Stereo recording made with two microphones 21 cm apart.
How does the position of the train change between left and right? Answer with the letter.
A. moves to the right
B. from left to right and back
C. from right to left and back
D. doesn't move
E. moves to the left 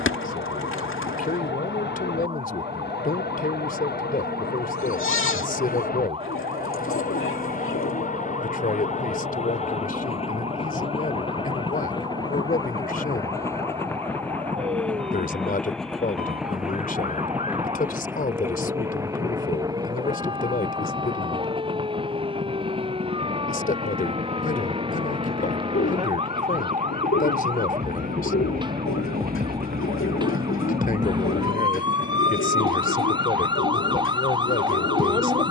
A.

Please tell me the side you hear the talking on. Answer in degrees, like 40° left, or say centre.
40° left.